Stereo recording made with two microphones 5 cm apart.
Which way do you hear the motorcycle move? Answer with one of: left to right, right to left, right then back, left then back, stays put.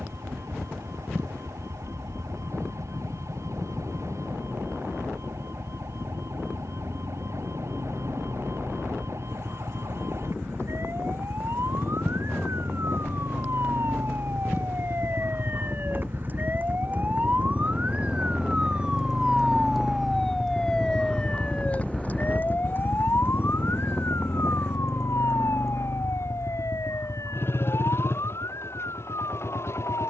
right to left.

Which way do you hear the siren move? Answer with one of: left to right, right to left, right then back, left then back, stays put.
right to left.